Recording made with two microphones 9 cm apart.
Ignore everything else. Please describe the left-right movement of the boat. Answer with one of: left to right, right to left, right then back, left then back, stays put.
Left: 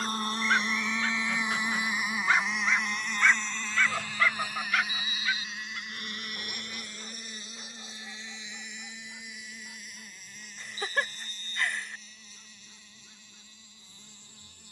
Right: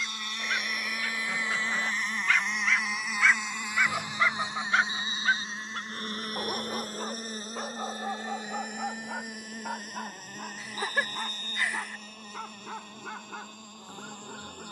left to right.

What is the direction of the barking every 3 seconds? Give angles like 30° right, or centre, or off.
40° left, 20° right, 60° right, 80° right, 80° right.